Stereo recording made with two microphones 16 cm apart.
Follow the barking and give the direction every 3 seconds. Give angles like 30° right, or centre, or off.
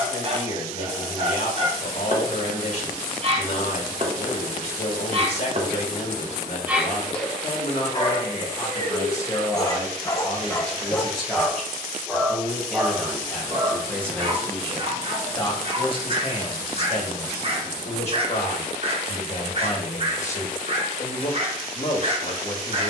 40° right, 40° right, 20° left, 10° left, 30° right, 40° right, 40° right, 40° right.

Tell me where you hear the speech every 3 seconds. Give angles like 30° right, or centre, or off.
50° left, 50° left, 40° left, 10° left, centre, 40° left, 50° left, 50° left.